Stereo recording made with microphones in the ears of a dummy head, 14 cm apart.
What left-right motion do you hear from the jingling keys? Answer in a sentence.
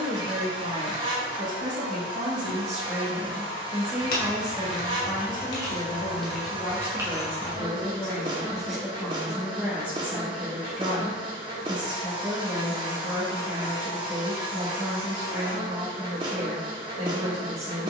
In this clip you hear the jingling keys move from left to right.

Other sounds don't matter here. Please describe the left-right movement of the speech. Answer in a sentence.
In this clip you hear the speech move from right to left and back again.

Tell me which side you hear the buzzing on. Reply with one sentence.
In this clip you hear the buzzing on the right.